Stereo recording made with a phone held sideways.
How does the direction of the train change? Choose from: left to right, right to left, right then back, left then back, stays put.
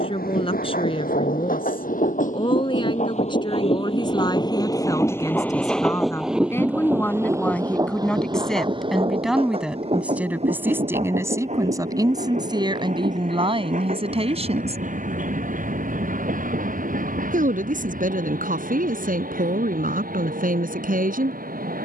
left to right.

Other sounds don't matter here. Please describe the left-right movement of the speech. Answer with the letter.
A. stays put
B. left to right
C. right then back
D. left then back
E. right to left
B.